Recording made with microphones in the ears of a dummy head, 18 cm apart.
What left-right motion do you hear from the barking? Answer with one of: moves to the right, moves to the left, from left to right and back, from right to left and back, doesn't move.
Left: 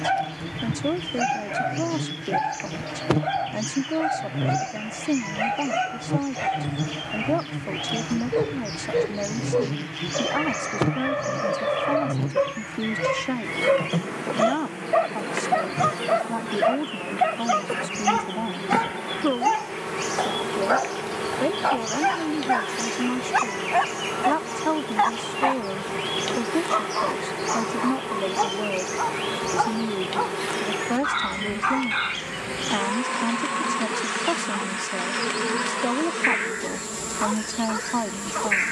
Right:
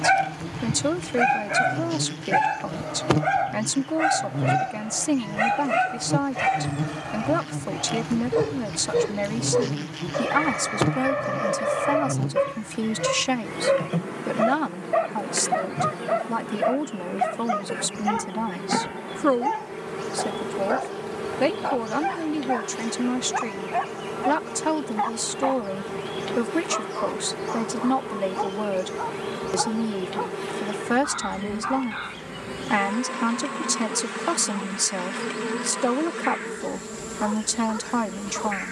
moves to the left.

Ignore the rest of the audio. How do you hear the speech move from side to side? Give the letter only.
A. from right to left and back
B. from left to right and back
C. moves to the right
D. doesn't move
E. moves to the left
D.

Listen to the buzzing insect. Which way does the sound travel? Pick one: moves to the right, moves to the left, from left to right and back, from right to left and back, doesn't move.
moves to the left.